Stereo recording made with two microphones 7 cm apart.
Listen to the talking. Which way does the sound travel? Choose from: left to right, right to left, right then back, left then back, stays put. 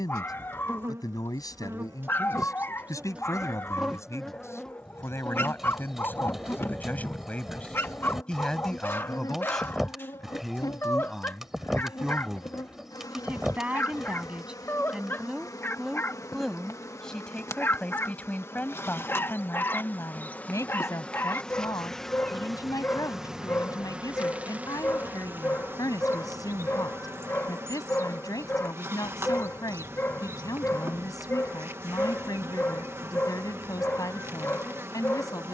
right then back.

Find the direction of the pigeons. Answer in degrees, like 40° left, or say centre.
centre.